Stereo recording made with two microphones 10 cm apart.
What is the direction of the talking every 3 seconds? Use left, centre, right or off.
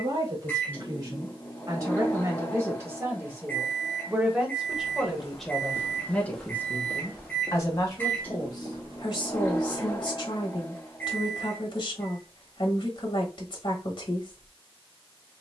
right, centre, left, left, left.